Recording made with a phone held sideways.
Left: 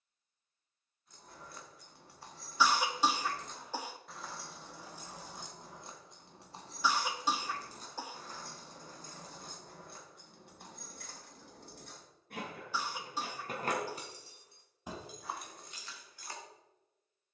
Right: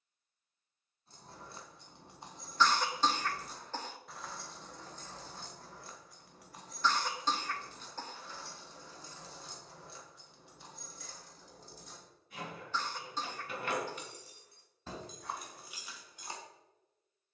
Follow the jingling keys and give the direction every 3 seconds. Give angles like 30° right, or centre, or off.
20° right, 10° left, 40° left, 60° left, 40° left, 10° right.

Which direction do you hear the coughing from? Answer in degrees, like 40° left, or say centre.
10° left.